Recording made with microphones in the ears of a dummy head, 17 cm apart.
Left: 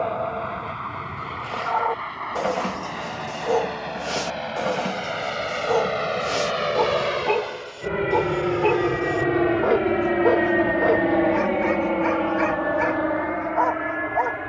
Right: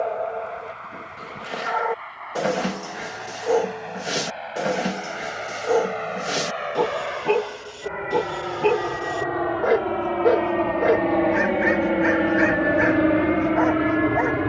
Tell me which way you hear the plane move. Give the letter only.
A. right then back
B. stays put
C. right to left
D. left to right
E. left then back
D.